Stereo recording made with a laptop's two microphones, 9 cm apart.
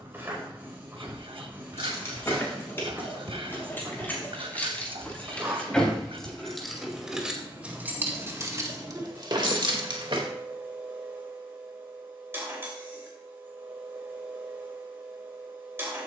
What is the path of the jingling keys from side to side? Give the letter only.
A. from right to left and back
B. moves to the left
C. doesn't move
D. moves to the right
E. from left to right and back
D.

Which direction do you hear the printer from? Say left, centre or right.
right.